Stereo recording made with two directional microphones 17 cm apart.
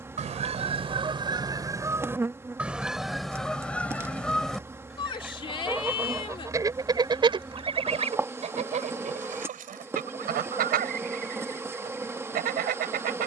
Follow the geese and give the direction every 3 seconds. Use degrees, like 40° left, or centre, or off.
20° right, centre, 30° right, 60° right, 60° right.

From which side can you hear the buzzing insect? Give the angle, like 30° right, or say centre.
10° right.